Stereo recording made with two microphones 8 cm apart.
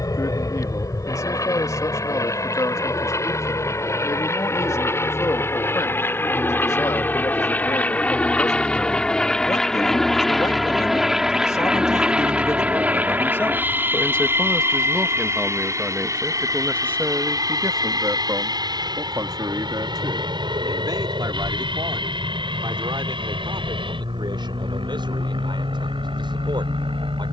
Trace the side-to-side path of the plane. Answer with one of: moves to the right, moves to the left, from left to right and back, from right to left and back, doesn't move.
moves to the right.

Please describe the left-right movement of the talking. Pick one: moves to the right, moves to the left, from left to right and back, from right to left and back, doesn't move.
moves to the right.